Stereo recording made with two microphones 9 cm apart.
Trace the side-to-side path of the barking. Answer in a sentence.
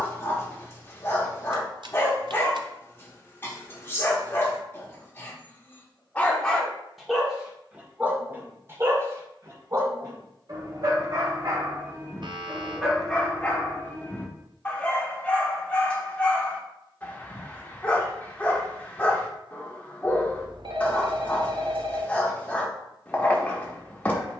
You can hear the barking go right and come back.